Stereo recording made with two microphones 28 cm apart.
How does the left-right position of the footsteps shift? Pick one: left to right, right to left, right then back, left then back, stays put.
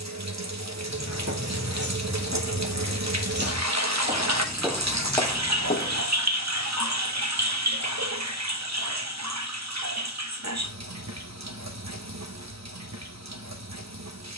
right to left.